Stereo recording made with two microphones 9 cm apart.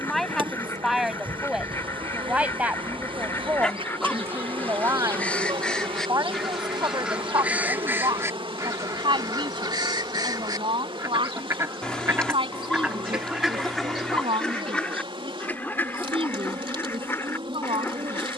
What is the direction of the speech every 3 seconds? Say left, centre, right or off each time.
centre, right, right, right, right, right.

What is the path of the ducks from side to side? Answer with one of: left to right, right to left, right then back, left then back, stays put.
right then back.